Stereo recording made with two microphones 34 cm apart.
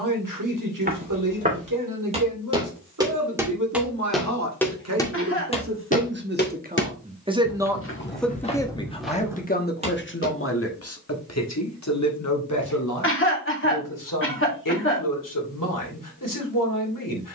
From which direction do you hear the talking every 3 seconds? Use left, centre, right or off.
right, right, centre, left, left, left.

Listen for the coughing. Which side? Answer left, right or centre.
left.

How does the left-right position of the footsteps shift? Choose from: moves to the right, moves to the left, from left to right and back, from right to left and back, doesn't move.
from right to left and back.